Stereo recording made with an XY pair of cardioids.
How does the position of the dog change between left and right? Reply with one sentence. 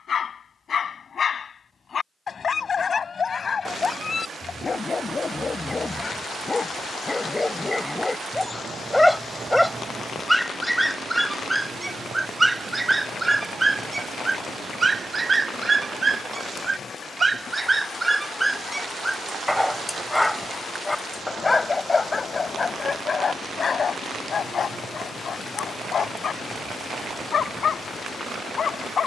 You can hear the dog move from left to right and back again.